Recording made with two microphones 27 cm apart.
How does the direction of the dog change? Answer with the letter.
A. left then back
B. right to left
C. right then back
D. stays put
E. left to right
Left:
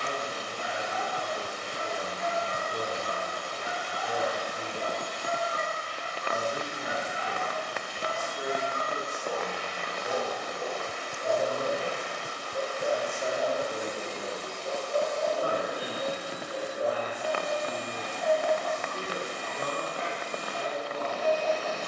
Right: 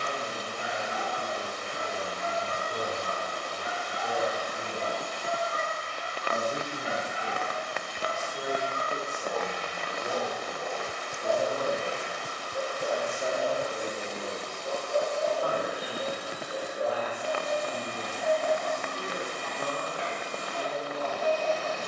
A.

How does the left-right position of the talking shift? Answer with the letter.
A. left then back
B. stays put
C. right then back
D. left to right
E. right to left
E.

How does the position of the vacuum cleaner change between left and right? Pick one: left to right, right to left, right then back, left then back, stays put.
stays put.